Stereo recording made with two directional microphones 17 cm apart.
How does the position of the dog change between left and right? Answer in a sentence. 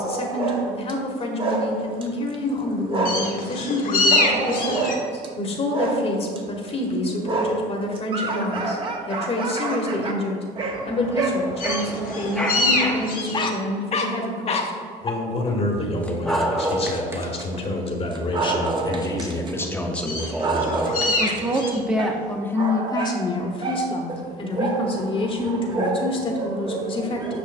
You can hear the dog go left and come back.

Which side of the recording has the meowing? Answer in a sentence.
You can hear the meowing on the left.